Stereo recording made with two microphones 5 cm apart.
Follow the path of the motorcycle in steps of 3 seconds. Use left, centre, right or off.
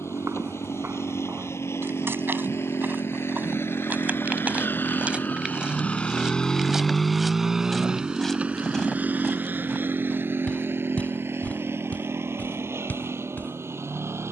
left, left, centre, right, right.